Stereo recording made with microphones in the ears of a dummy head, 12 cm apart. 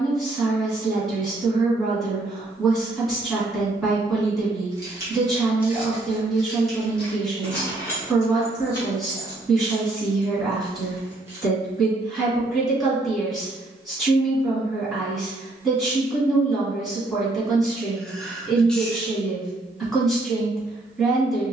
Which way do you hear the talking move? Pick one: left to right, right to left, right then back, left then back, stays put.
stays put.